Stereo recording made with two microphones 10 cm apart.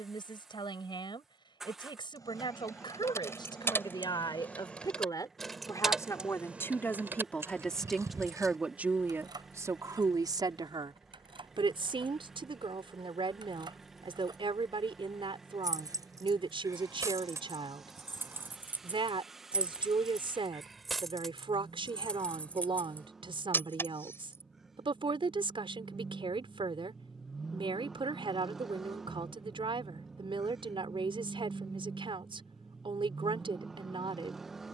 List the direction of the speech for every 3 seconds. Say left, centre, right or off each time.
left, left, centre, right, right, right, right, right, right, right, right, right.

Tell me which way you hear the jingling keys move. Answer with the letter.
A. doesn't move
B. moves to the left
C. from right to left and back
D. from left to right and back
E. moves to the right
D.